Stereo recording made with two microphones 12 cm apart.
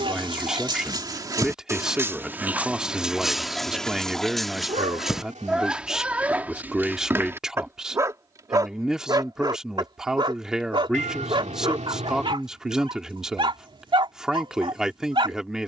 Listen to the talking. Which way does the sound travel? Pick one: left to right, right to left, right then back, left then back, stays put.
stays put.